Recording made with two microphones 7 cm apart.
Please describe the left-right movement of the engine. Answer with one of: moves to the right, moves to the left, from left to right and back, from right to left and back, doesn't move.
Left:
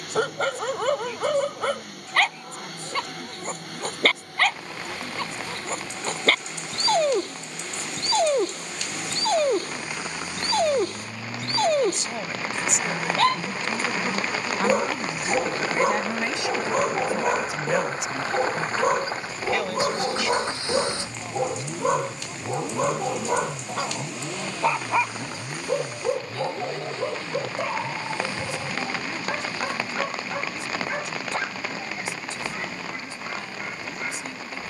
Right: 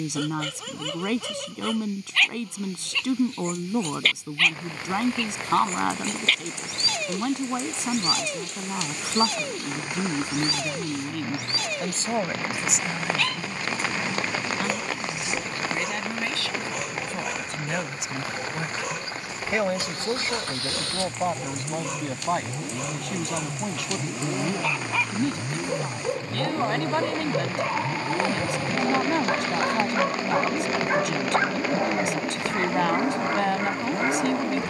moves to the right.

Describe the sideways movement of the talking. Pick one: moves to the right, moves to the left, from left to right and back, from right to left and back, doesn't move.
from right to left and back.